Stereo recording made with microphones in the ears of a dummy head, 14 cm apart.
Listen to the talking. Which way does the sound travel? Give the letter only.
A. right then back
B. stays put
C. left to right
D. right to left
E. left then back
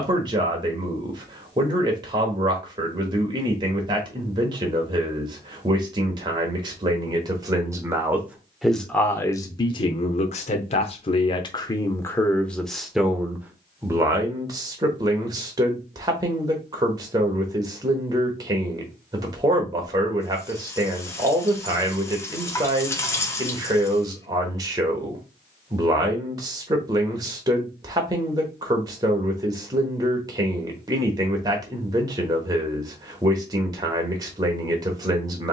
E.